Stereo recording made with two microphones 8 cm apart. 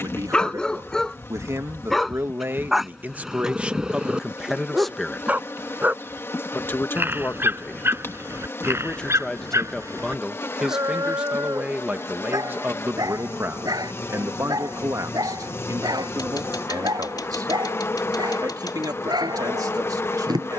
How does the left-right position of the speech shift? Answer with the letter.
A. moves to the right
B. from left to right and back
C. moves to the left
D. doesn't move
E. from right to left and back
E.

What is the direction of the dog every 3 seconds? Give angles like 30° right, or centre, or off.
10° left, 10° right, 30° right, 40° right, 50° right, 60° right, 60° right.